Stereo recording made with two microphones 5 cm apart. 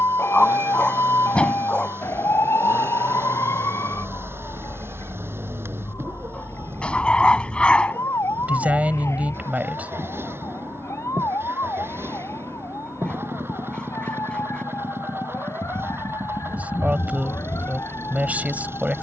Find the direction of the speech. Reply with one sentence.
You can hear the speech on the right.